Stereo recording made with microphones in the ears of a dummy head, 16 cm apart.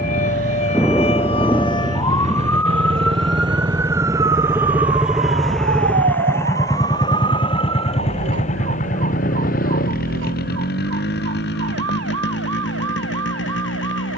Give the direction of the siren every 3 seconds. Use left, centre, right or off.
left, right, right, right, right.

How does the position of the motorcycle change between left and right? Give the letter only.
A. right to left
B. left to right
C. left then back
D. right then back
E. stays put
A.